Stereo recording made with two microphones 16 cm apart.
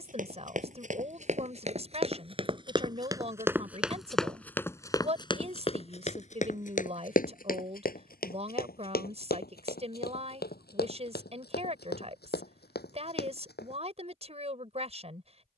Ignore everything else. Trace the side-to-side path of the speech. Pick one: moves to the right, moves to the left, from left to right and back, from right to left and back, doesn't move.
doesn't move.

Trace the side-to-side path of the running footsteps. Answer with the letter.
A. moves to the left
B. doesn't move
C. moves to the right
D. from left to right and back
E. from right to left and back
A.